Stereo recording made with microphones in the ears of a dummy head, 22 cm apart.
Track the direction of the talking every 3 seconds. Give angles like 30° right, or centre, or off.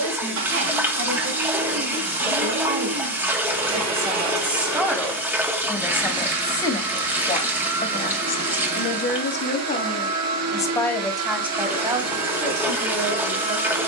30° right, 10° right, 30° left, 20° left, 30° right.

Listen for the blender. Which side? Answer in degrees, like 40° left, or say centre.
70° right.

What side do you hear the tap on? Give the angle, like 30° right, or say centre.
10° right.